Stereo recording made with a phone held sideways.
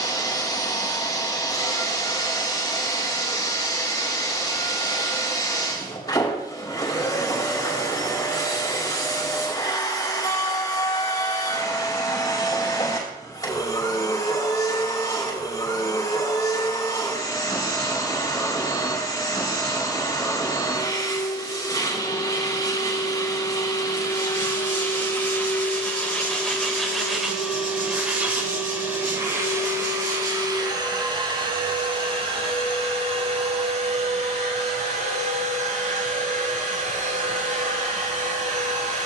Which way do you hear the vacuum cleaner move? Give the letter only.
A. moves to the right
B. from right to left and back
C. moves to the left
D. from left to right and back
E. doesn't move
A.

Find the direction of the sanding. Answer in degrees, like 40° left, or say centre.
60° right.